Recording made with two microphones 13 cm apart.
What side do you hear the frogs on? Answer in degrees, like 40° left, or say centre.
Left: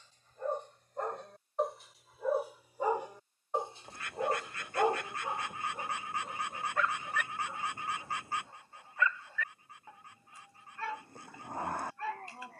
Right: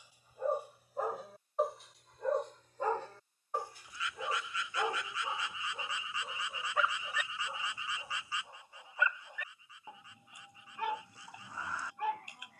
50° left.